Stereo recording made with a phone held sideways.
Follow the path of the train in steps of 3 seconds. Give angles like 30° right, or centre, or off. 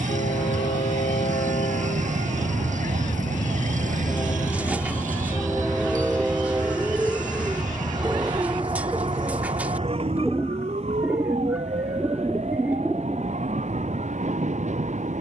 60° left, 20° left, 30° right, 50° right, 50° right.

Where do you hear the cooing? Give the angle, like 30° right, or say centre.
10° right.